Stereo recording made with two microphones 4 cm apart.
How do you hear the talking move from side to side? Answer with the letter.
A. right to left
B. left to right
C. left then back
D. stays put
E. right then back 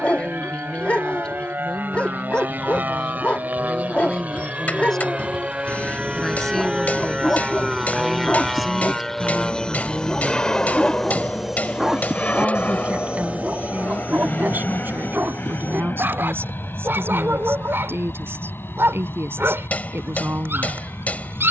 B.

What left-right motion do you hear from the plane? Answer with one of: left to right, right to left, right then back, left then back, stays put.
right to left.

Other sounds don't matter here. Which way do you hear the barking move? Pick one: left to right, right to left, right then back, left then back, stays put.
left to right.